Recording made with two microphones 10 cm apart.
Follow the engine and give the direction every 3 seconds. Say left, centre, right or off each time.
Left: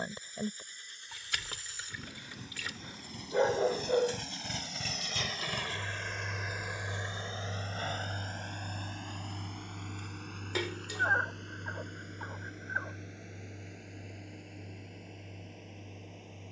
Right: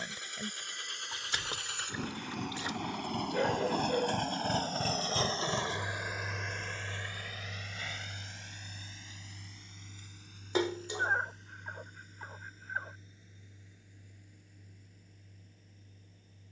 right, right, left, left, left, left.